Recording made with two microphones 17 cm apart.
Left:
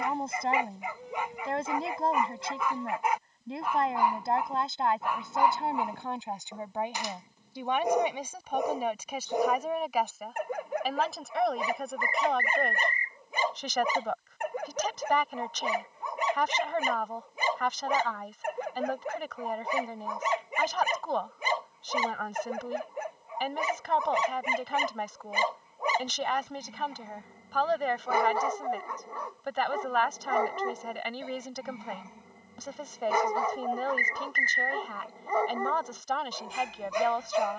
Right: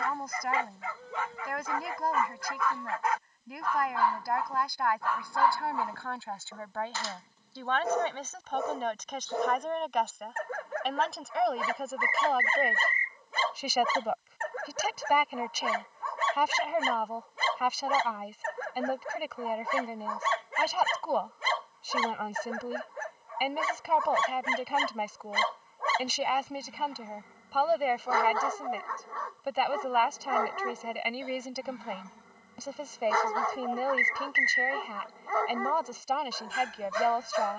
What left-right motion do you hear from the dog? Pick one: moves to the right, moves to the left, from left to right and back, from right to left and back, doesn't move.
doesn't move.